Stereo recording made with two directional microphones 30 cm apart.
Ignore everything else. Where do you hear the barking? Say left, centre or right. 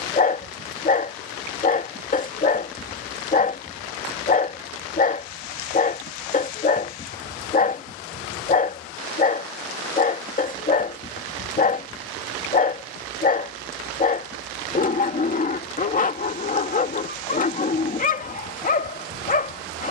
left.